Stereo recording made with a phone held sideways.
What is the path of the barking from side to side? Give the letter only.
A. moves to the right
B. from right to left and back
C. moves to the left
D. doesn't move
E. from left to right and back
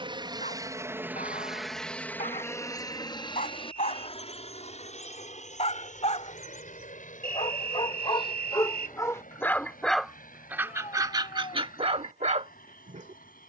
A.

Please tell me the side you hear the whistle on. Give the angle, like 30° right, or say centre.
50° right.